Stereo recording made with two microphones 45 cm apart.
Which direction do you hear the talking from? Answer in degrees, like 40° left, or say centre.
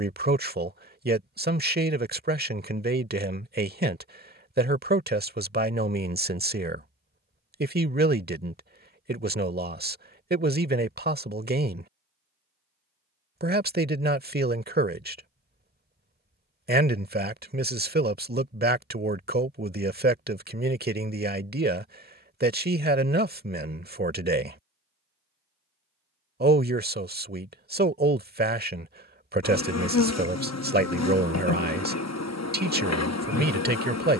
20° right.